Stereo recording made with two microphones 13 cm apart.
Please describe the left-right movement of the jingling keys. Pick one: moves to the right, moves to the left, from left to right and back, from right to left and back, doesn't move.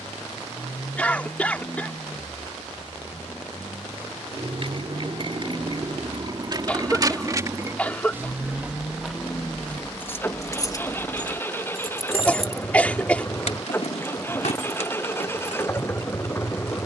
moves to the left.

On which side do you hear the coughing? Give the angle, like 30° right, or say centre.
10° left.